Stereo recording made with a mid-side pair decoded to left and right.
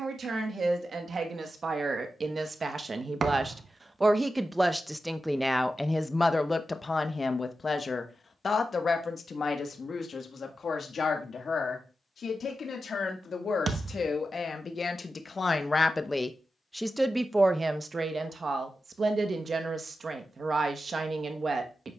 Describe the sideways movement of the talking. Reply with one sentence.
You can hear the talking go left and come back.